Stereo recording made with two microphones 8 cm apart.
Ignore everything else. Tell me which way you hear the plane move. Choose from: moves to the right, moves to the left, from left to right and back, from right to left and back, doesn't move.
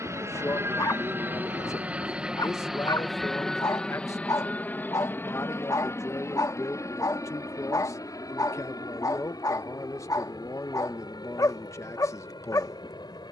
moves to the left.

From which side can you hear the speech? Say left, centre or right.
left.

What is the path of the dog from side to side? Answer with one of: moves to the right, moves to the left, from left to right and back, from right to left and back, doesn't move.
doesn't move.